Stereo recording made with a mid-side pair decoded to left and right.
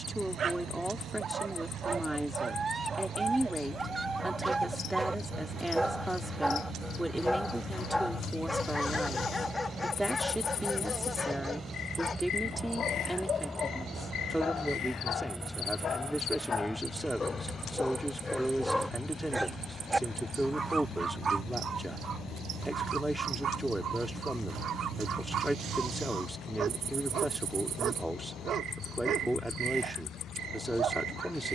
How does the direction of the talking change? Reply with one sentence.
In this clip you hear the talking stay in one place.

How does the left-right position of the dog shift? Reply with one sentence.
You can hear the dog go left and come back.